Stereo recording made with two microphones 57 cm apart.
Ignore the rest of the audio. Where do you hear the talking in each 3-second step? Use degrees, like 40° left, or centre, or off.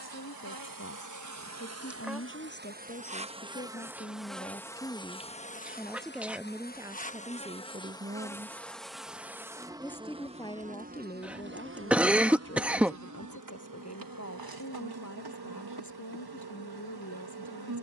20° left, 10° left, 10° right, 10° left, 20° left, 30° left.